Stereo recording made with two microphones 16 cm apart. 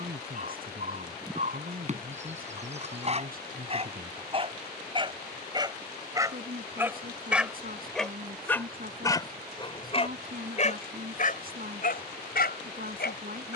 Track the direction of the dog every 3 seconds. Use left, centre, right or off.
right, right, centre, left, left.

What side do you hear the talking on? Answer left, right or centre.
right.